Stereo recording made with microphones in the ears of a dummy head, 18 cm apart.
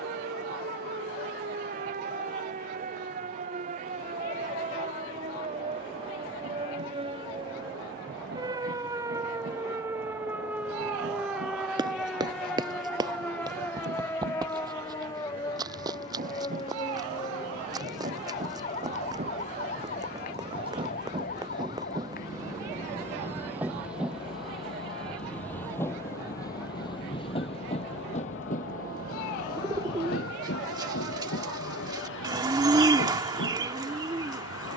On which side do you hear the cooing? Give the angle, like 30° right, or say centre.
20° right.